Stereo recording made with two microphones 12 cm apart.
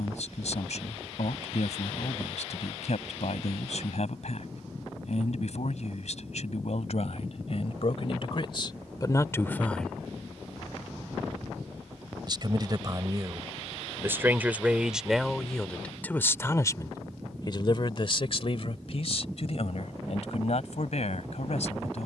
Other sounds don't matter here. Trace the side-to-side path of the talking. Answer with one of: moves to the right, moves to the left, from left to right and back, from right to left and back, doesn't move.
from left to right and back.